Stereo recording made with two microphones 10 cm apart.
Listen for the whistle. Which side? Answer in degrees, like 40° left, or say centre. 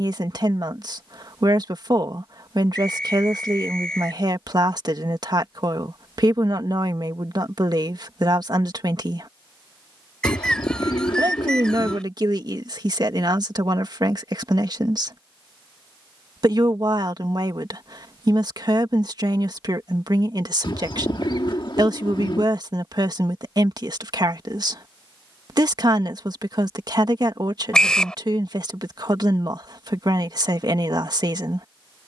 10° left.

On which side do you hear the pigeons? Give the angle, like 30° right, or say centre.
60° left.